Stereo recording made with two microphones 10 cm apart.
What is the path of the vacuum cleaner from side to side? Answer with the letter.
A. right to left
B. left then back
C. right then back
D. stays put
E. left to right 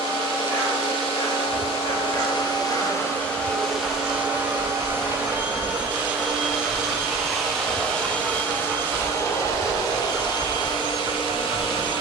C.